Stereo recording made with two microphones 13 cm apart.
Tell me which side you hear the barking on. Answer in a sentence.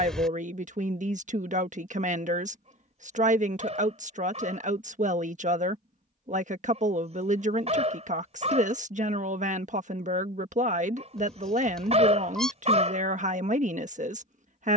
In this clip you hear the barking on the right.